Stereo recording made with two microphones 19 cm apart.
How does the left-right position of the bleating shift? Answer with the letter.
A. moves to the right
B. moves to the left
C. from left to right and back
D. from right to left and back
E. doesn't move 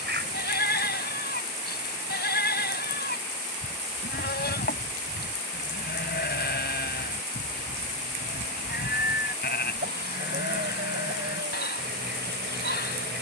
E.